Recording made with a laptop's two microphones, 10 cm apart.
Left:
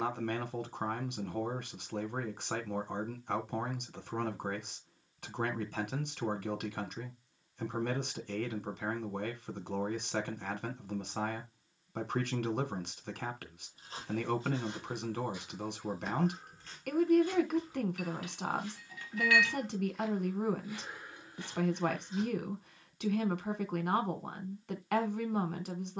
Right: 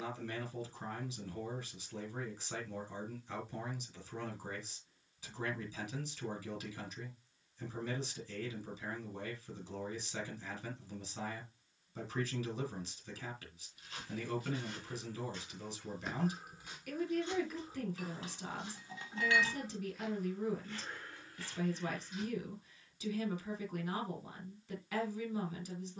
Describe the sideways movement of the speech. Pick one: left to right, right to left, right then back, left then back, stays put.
stays put.